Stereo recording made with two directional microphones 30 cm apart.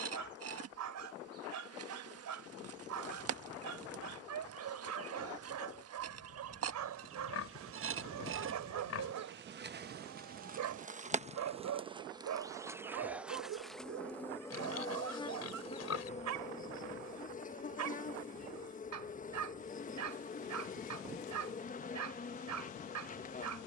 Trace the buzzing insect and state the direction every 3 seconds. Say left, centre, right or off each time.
right, right, right, right, centre, left, left, left.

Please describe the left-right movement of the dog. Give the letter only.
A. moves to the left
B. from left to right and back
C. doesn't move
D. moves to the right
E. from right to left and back
C.